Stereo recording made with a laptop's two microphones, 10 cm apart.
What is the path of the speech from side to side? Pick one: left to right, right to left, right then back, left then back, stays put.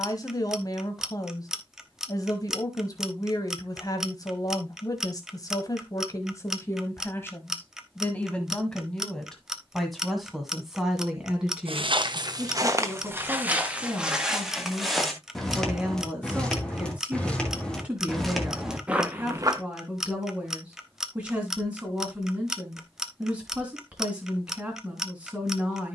left to right.